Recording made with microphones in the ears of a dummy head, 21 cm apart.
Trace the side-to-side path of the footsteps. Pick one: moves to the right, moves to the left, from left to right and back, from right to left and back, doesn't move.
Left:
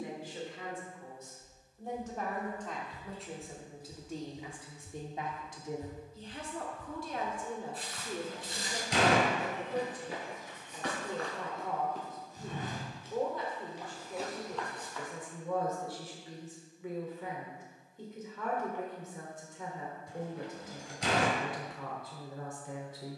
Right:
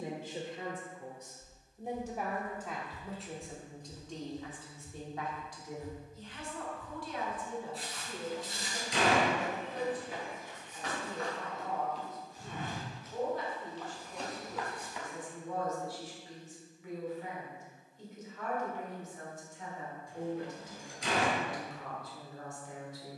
from right to left and back.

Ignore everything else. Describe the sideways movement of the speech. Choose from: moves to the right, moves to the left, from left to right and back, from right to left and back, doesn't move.
moves to the left.